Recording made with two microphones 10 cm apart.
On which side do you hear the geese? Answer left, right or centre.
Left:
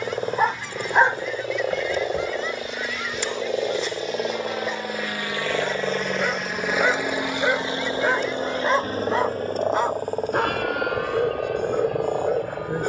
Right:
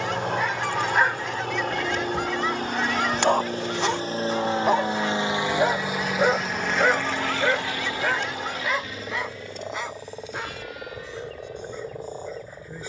right.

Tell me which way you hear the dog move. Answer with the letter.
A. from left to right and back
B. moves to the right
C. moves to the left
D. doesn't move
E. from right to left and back
A.